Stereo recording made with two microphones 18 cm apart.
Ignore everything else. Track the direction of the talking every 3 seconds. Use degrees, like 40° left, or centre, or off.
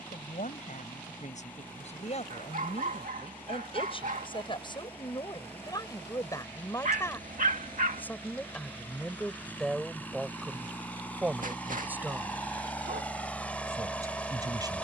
40° left, 30° left, 10° left, centre, 20° right.